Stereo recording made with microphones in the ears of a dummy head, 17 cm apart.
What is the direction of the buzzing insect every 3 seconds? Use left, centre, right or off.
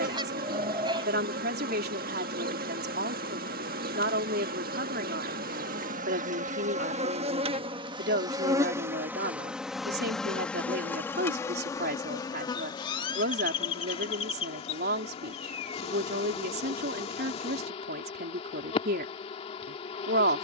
right, right, right, centre, left, left, left.